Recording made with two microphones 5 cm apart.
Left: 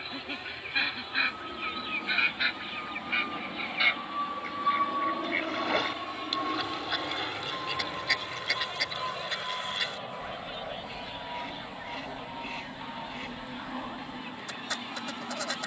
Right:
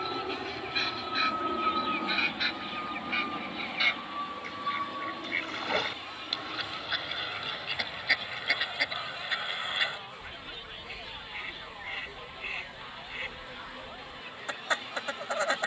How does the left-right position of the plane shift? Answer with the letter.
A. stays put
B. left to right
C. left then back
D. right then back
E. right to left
E.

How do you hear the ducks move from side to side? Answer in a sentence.
In this clip you hear the ducks move from left to right.